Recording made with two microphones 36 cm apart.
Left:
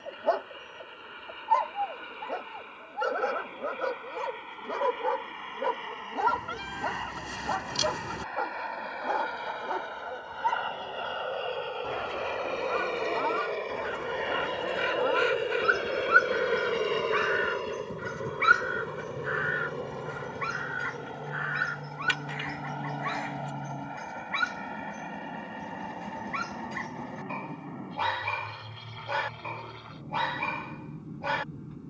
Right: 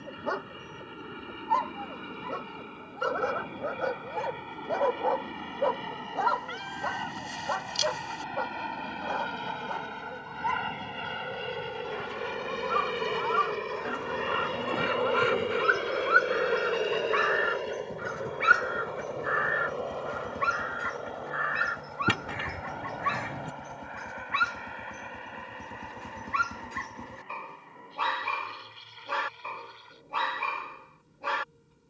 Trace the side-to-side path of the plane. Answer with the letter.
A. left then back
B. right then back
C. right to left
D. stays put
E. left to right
C.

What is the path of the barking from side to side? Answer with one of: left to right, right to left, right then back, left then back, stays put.
left then back.